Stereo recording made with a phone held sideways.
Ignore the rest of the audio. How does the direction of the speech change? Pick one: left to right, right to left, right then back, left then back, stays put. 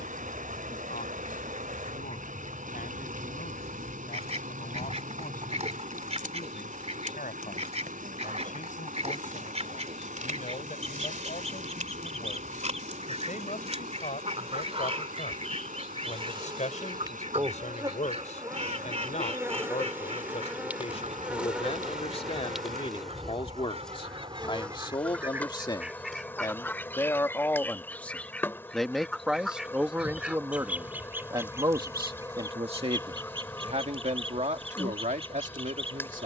left to right.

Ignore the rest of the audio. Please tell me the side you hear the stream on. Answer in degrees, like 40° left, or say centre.
60° right.